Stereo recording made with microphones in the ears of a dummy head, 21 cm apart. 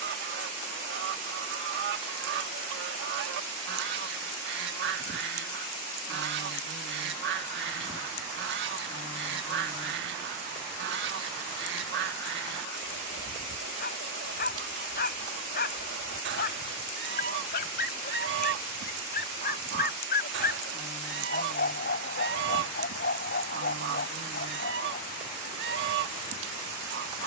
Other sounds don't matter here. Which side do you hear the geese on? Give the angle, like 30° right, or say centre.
60° right.